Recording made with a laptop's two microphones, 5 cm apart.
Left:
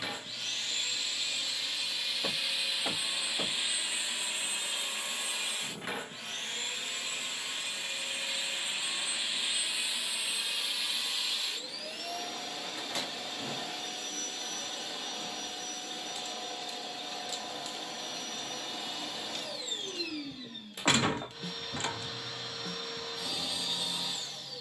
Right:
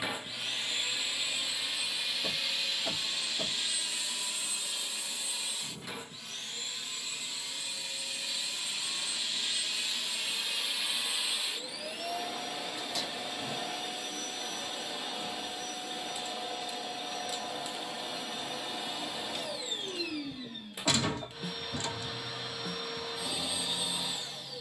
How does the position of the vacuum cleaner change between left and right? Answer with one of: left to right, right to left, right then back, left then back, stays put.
left then back.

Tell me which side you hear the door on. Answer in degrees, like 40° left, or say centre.
40° left.